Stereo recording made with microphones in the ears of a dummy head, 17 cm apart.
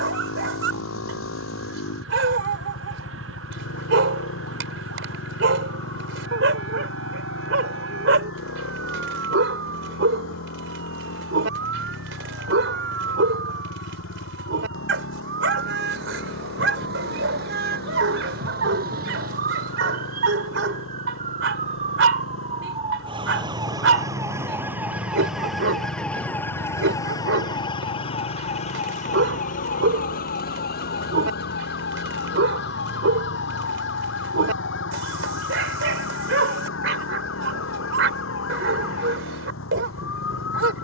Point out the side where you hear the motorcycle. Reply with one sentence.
You can hear the motorcycle on the left.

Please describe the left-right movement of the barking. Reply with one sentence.
You can hear the barking stay in one place.